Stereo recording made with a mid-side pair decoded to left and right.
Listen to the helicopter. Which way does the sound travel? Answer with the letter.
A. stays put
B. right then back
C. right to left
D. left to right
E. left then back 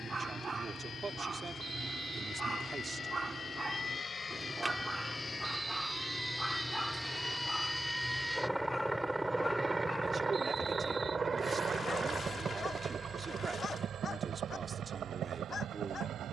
D.